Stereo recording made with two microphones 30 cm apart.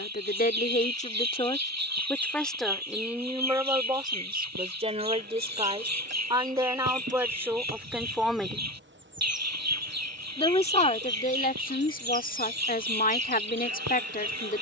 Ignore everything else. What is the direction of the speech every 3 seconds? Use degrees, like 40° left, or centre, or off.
20° left, 10° right, 10° right, 20° left, 30° left.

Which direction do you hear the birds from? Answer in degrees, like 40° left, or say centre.
60° right.